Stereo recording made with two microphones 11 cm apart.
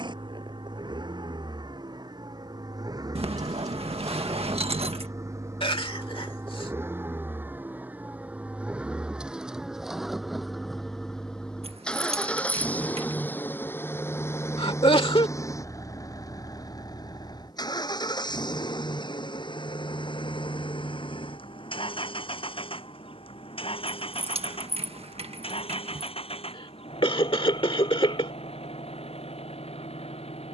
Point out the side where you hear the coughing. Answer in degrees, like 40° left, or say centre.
50° left.